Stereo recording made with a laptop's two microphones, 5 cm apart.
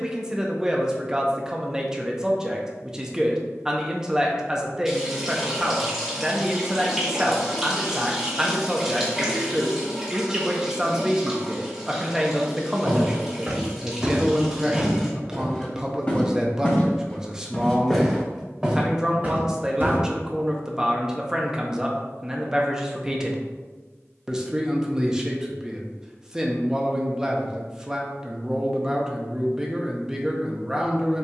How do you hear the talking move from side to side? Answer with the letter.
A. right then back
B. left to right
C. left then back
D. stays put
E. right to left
D.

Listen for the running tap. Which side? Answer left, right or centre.
centre.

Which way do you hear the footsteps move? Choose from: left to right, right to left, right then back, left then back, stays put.
left then back.